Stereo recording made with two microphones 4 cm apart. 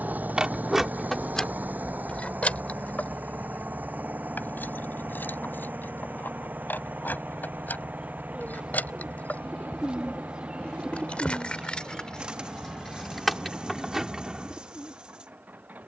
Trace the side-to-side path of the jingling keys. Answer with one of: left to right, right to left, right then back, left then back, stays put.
left then back.